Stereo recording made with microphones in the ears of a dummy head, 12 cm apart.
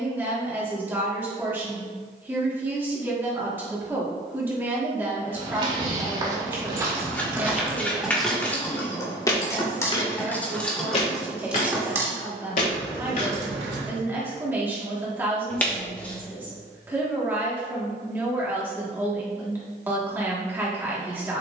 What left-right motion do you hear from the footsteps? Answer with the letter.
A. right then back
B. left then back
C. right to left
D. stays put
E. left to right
C.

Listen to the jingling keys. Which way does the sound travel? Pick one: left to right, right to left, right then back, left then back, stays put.
left then back.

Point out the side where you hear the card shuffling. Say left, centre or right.
centre.